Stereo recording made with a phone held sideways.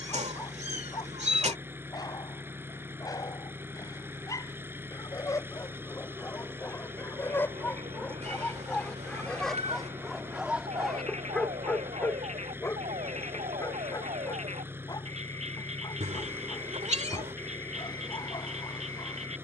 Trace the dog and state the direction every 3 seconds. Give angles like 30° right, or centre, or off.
30° left, 20° left, 10° left, centre, 20° left, 30° left, 30° left.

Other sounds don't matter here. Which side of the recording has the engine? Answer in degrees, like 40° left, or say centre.
10° right.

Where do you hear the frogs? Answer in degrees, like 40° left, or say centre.
50° right.